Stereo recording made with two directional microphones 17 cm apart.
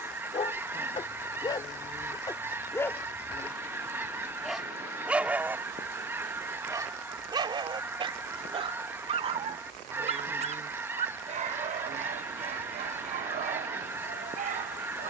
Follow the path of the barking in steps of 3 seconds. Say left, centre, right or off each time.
left, centre, right, right, right.